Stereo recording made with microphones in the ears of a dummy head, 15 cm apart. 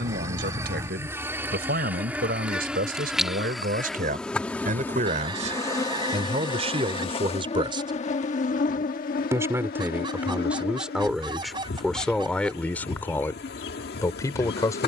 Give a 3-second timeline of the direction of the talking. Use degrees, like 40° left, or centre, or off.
60° right, 50° right, 30° right, 10° right, 10° left.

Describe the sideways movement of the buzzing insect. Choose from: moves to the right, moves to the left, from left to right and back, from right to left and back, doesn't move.
moves to the left.